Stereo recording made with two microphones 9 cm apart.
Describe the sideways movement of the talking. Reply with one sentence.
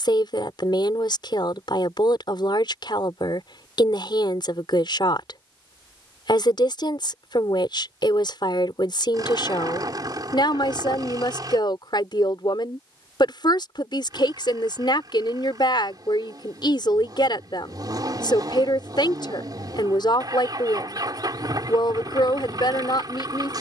In this clip you hear the talking stay put.